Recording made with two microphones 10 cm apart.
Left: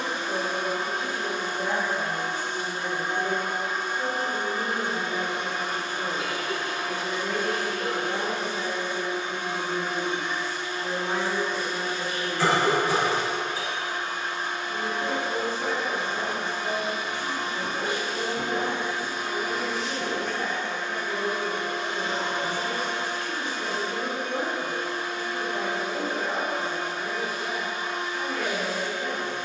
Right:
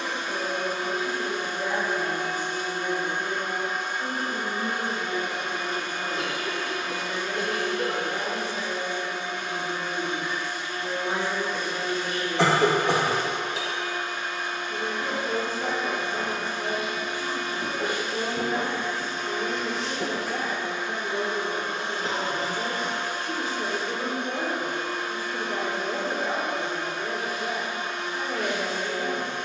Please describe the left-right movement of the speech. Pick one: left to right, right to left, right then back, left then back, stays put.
left to right.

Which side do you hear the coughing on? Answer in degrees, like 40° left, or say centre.
70° right.